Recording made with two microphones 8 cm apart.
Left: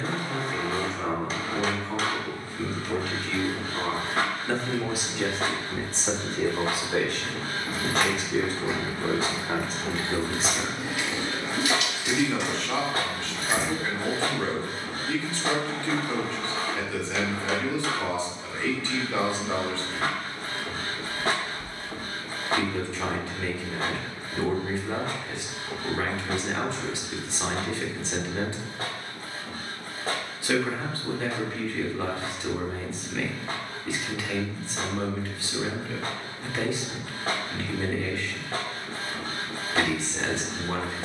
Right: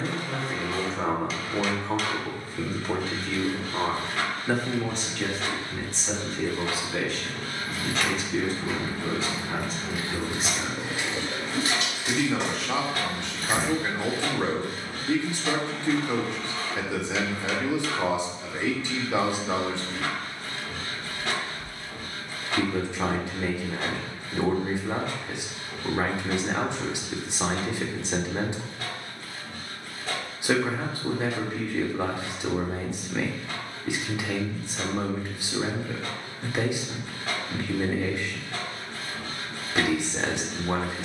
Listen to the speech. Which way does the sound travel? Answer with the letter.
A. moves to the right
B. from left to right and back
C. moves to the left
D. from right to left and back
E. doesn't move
D.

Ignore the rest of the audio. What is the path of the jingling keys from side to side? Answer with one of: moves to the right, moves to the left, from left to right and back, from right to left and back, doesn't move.
moves to the right.